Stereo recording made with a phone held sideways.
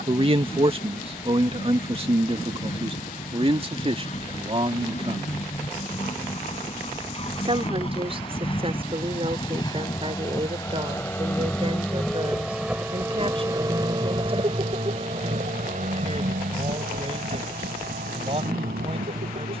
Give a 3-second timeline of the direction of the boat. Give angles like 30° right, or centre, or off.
50° left, 50° left, 40° left, 20° left, 20° right, 60° right, 80° right.